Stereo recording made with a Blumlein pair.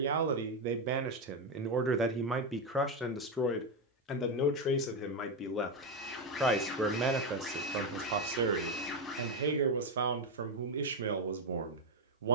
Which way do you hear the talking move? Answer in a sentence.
You can hear the talking go left and come back.